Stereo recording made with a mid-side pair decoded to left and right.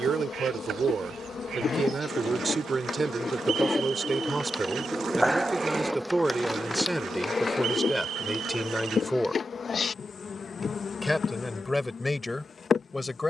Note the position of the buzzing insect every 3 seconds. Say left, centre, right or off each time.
left, centre, left, left, left.